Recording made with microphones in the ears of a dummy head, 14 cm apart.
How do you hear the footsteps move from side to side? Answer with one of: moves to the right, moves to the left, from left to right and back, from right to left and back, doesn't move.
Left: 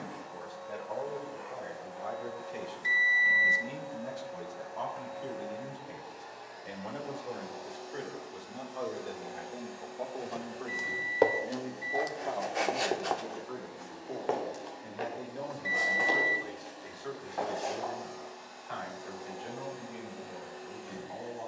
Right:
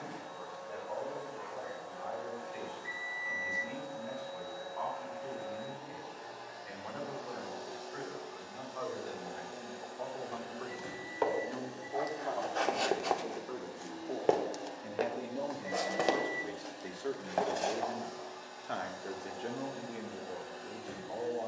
moves to the right.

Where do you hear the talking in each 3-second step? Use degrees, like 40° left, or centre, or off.
50° left, 50° left, 40° left, 20° left, centre, 30° right, 60° right.